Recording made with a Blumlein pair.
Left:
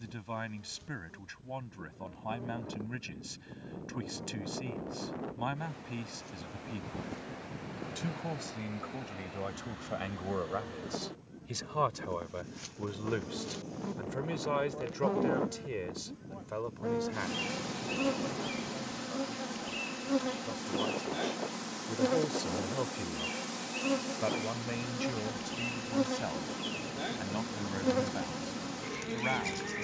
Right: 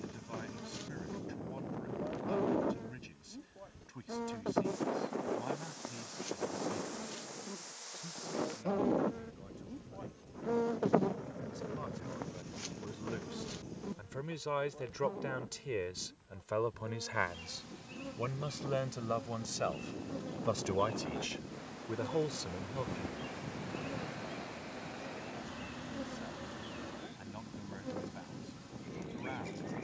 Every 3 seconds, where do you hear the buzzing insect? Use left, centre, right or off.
right, right, right, right, centre, left, left, left, left, left.